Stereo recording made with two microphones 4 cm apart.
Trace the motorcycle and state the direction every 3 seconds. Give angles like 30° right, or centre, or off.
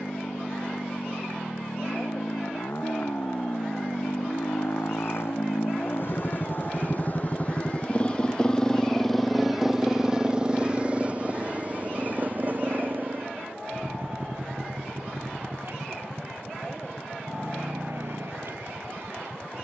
80° left, 60° left, 30° left, 20° right, 50° right, 60° right, 60° right.